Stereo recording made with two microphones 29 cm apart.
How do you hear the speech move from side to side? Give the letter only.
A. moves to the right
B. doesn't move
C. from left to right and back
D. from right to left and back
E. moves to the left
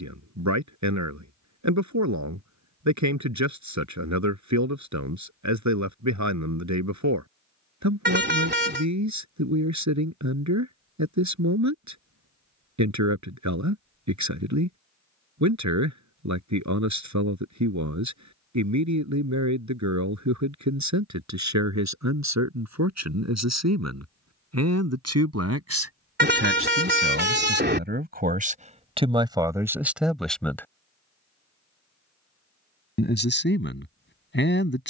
E.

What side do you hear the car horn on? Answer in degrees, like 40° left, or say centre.
40° right.